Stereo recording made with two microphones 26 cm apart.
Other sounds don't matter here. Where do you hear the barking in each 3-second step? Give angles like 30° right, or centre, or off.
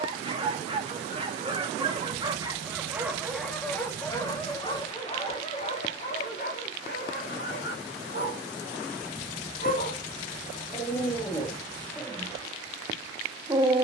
20° right, 10° left, 40° left, 20° left, 10° right.